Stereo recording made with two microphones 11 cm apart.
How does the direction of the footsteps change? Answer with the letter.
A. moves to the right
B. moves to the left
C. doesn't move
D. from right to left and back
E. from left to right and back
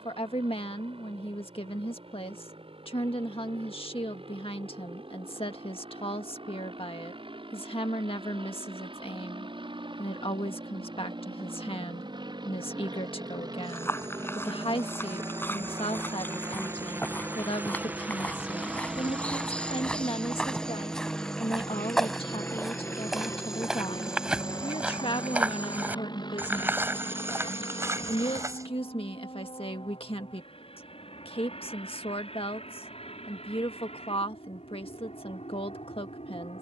A.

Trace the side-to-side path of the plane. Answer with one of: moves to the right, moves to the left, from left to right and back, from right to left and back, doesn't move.
moves to the left.